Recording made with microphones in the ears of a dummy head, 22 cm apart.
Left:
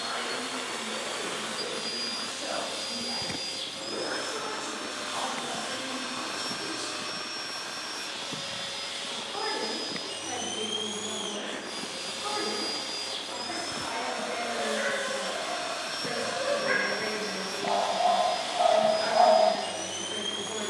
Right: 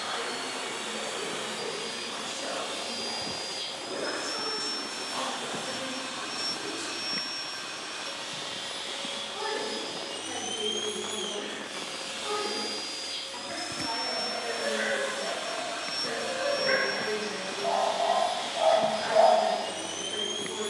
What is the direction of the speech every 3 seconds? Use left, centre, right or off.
right, right, centre, left, left, left, left.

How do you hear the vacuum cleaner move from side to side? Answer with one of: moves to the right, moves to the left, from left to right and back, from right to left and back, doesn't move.
doesn't move.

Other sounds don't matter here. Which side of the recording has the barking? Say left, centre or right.
centre.